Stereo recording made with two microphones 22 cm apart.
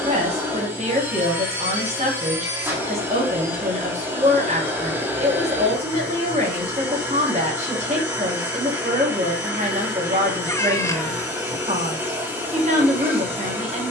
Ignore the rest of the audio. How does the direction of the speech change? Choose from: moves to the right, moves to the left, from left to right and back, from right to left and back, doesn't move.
doesn't move.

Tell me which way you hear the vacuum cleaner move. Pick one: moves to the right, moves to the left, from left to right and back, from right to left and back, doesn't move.
doesn't move.